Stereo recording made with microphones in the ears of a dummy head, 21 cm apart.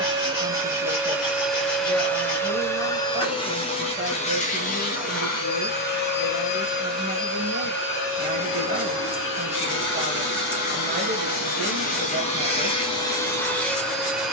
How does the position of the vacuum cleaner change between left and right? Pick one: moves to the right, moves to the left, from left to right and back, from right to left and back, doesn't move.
from right to left and back.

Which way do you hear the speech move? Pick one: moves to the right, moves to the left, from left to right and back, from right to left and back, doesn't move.
doesn't move.